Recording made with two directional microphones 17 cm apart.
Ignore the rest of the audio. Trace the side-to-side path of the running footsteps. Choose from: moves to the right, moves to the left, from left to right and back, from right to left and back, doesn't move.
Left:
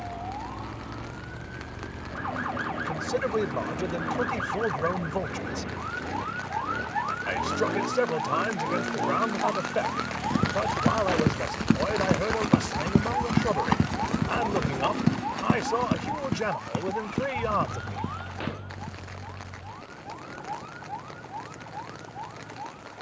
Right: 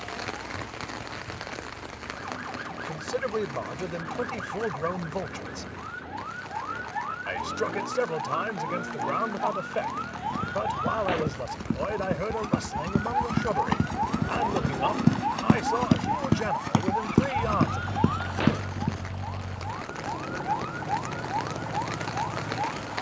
moves to the right.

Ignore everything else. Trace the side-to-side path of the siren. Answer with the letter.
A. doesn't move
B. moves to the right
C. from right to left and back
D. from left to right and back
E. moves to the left
B.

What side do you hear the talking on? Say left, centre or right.
centre.